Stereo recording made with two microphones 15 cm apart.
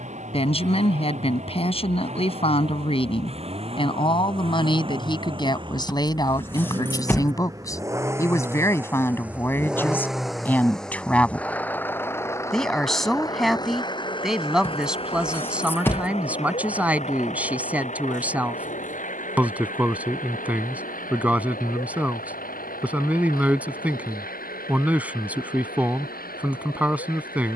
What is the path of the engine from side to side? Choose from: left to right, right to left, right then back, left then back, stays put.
right to left.